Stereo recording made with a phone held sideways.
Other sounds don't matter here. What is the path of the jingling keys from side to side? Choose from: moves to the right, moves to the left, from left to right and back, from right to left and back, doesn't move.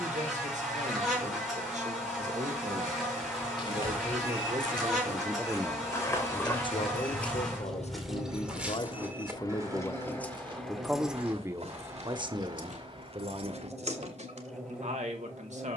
moves to the right.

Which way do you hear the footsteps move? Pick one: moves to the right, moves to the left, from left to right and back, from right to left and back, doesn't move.
moves to the right.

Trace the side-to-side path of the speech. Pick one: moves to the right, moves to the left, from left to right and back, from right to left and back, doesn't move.
from right to left and back.